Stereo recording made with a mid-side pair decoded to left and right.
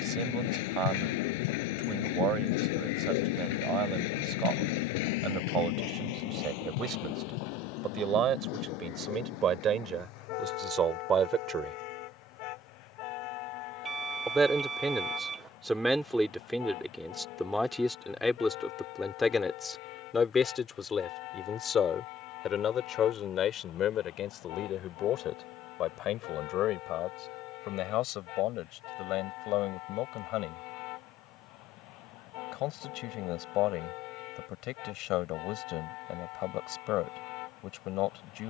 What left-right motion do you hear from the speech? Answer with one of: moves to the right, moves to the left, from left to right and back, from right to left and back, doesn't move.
moves to the left.